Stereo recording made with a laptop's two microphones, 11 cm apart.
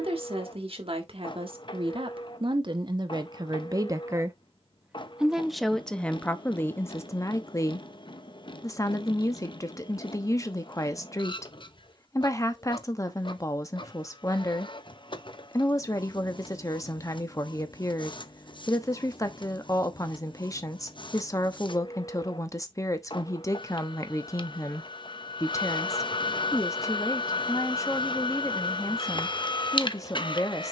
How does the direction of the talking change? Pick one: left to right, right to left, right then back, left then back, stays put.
right to left.